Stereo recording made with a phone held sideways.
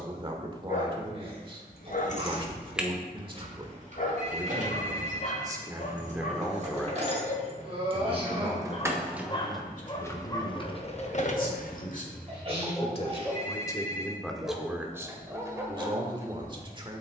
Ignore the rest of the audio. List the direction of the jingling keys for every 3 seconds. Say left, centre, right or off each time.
left, right, right, left, off, off.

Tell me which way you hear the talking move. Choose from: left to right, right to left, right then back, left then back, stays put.
left then back.